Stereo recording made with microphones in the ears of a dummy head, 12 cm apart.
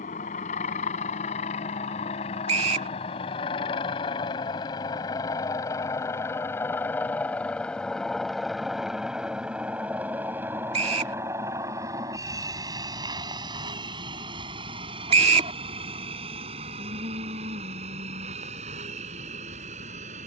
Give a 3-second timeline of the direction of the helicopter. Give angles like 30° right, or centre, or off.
50° left, 30° left, 10° left, 10° right, 30° right, 40° right, 50° right.